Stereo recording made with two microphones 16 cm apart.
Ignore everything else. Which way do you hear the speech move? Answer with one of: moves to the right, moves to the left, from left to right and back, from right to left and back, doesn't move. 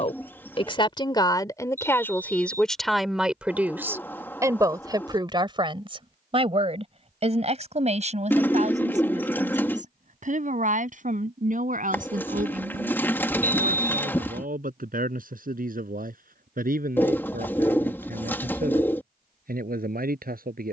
moves to the right.